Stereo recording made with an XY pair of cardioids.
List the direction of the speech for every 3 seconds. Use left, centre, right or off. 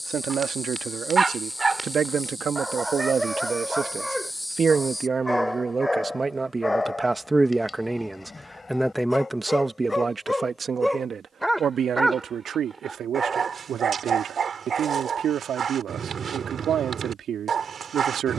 right, right, centre, right, right, right.